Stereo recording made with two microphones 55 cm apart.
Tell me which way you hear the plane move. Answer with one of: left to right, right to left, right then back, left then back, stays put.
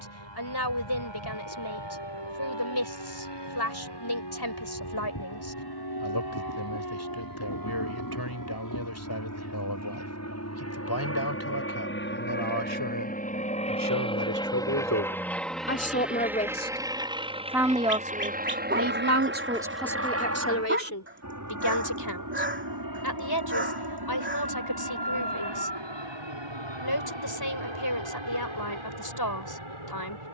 left to right.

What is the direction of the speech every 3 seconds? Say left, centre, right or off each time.
left, left, left, left, left, centre, centre, left, left, left.